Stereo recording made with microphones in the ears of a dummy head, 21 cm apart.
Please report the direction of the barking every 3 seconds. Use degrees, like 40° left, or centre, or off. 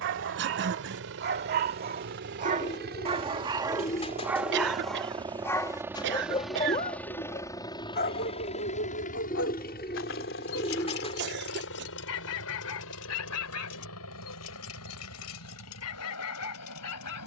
40° right, 10° right, 30° left, 60° left, 70° left, 70° left.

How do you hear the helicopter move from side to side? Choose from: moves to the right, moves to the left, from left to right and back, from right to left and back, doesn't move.
moves to the left.